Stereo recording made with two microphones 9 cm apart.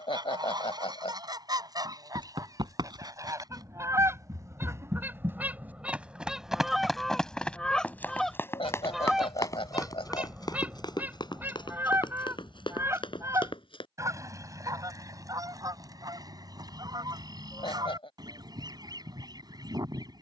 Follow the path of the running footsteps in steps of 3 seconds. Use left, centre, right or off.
right, right, centre, left, left, off, off.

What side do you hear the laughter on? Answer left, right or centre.
left.